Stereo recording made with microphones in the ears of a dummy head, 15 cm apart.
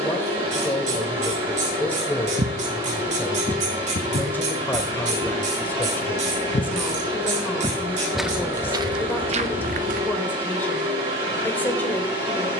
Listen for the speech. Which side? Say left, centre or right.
centre.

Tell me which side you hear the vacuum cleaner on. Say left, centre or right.
right.